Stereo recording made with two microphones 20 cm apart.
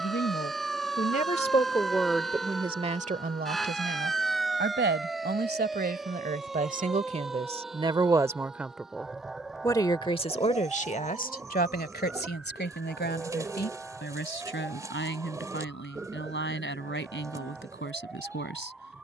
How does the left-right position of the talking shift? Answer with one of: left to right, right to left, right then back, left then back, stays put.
right then back.